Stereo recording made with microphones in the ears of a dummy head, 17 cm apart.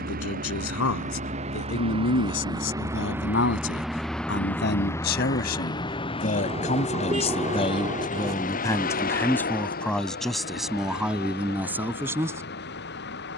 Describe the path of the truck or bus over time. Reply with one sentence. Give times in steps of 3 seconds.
You can hear the truck or bus on the right from 0 s, in the centre from 3 s and on the left from 6 s.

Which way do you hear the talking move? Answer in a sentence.
You can hear the talking move from left to right.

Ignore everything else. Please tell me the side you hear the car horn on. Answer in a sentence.
You can hear the car horn on the right.